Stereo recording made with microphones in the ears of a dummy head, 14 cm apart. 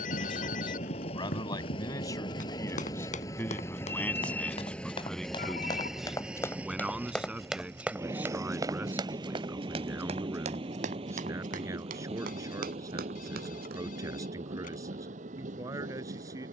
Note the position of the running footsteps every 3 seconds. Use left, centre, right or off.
left, left, centre, right, right, off.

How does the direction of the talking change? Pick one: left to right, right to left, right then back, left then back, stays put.
left to right.